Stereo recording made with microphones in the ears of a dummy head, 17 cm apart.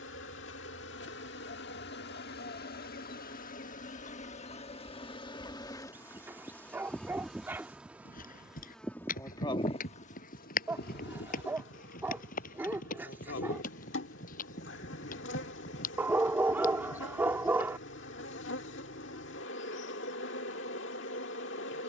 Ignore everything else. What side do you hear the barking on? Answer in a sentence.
You can hear the barking in the centre.